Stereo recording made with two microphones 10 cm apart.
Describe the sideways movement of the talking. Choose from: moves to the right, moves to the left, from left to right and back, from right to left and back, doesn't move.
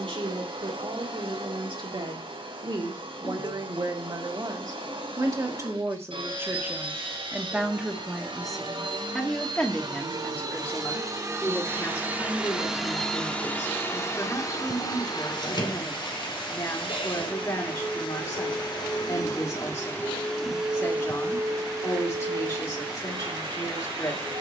moves to the left.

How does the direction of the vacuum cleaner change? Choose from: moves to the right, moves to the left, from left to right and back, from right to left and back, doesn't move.
from right to left and back.